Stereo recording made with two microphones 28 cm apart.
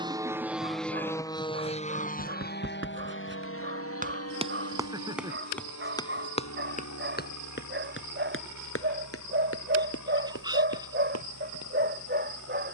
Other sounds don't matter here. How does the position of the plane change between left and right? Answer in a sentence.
You can hear the plane go from the right side to the left.